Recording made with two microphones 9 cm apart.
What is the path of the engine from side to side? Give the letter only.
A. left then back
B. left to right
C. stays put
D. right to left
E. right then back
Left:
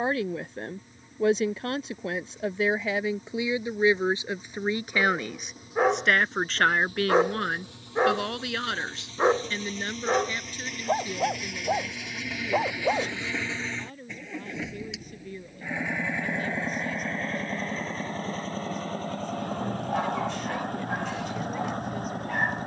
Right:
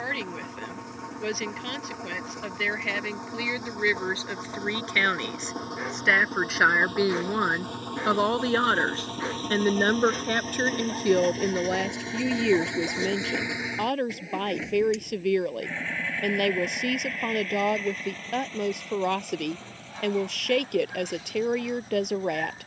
D.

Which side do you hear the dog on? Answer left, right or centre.
left.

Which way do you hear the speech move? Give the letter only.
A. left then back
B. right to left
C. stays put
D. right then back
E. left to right
E.